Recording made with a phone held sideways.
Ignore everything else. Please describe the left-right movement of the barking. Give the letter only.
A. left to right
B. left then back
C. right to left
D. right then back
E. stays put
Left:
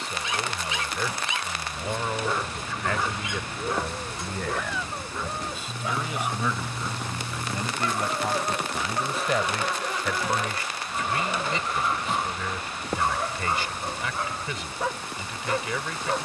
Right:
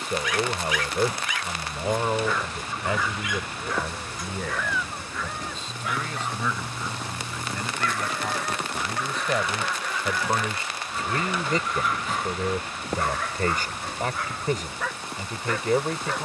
E.